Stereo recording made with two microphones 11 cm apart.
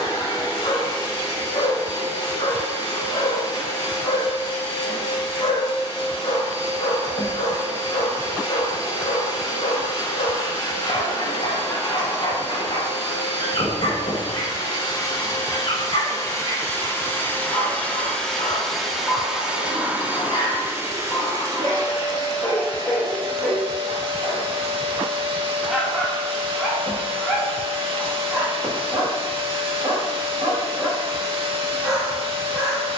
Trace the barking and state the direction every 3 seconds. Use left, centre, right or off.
left, left, left, left, left, left, left, left, centre, centre, centre.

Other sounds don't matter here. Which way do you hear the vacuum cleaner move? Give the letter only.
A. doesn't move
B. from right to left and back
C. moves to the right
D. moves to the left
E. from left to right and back
C.